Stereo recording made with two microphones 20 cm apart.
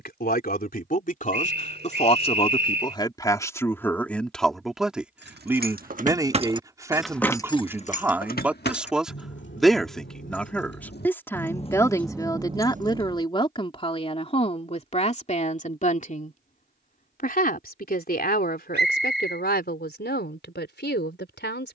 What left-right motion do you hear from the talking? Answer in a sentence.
In this clip you hear the talking go right and come back.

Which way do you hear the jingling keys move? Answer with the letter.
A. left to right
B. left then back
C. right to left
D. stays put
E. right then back
B.